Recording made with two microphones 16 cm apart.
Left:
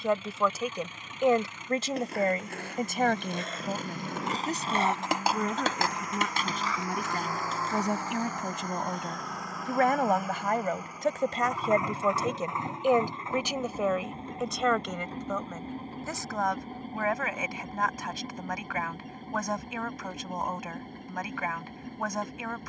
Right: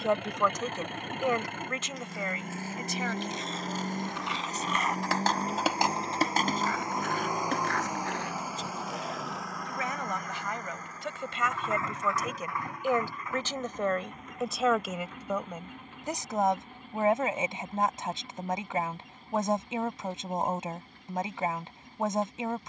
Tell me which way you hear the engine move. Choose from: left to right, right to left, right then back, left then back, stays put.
right to left.